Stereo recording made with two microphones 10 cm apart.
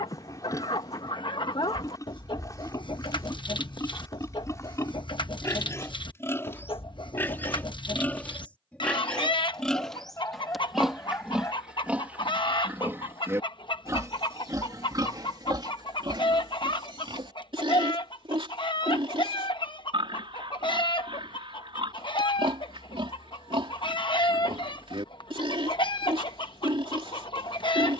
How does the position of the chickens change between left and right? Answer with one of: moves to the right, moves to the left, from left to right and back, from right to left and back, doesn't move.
doesn't move.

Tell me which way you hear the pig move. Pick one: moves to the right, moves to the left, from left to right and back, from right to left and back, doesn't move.
moves to the right.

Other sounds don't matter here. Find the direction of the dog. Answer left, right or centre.
left.